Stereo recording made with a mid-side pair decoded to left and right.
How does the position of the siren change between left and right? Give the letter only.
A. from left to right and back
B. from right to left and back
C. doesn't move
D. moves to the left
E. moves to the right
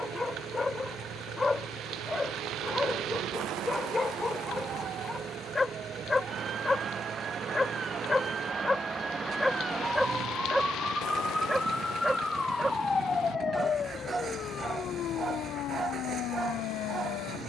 D.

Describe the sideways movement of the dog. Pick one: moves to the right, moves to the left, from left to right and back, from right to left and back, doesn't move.
moves to the right.